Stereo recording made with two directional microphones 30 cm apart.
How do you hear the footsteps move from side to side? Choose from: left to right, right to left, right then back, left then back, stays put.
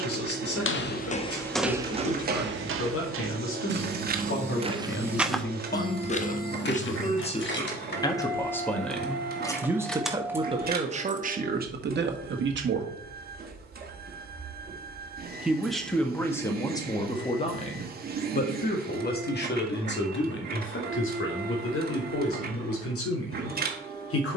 right then back.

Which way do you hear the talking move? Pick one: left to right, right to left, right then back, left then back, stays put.
right then back.